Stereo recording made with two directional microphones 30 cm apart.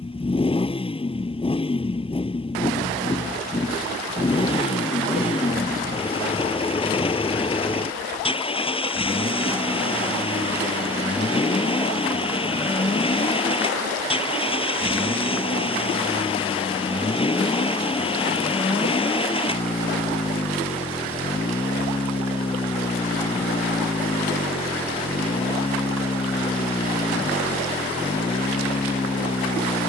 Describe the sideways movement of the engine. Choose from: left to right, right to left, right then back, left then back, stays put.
stays put.